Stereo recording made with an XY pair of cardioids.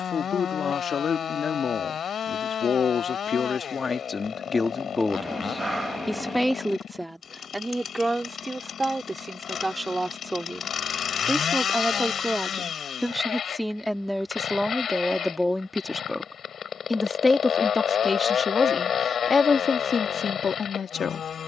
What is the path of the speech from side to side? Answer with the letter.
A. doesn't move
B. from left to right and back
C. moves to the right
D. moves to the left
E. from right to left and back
B.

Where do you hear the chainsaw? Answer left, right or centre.
left.